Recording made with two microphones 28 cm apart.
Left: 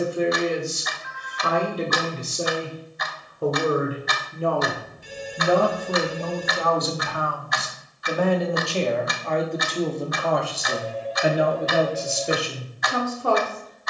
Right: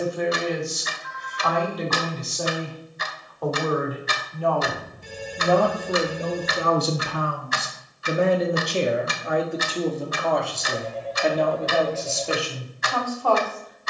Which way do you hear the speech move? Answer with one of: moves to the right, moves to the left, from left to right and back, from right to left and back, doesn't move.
from left to right and back.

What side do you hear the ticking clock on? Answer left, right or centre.
right.